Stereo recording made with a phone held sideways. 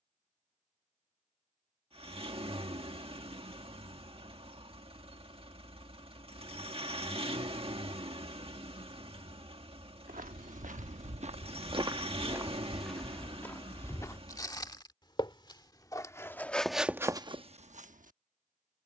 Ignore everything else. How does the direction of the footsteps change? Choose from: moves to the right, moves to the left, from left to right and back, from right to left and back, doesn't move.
from right to left and back.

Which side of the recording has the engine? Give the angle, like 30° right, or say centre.
40° right.